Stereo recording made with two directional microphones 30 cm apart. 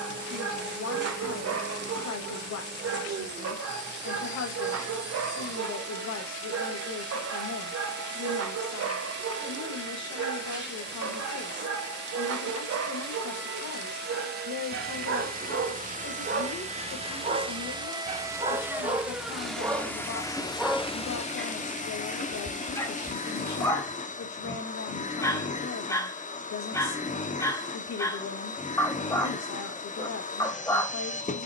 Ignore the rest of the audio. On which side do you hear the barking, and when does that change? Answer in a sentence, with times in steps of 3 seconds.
In this clip you hear the barking on the right from 0 s and in the centre from 18 s.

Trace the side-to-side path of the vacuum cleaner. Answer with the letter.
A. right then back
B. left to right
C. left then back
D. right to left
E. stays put
D.